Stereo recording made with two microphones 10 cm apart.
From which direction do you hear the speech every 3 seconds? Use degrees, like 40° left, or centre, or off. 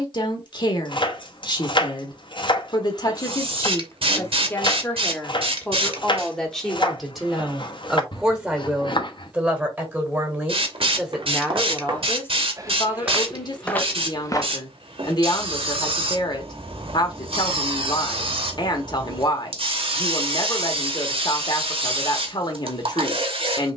50° left, 30° left, centre, 10° right, 40° left, 50° left, 50° left, 50° left.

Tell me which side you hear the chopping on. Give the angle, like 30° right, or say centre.
50° left.